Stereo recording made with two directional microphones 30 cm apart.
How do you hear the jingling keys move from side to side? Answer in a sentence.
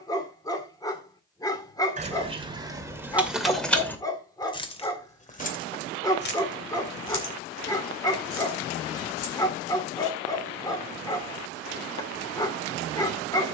You can hear the jingling keys travel towards the left.